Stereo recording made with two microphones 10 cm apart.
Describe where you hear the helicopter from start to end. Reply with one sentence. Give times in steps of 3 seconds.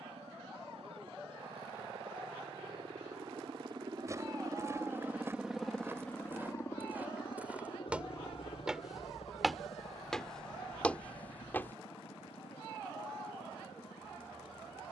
In this clip you hear the helicopter on the right from 0 s and on the left from 6 s.